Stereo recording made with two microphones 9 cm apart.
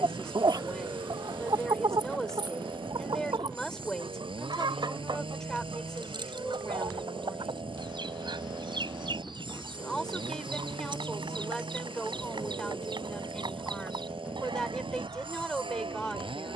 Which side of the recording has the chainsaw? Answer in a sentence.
You can hear the chainsaw on the right.